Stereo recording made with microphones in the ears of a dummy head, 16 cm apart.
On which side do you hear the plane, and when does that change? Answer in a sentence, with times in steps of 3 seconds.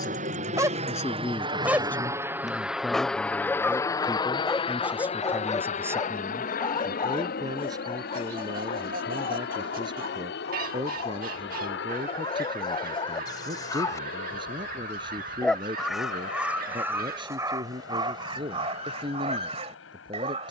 In this clip you hear the plane on the right from 0 s and on the left from 3 s.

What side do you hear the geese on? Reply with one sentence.
You can hear the geese on the right.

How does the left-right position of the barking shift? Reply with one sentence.
You can hear the barking move from right to left and back again.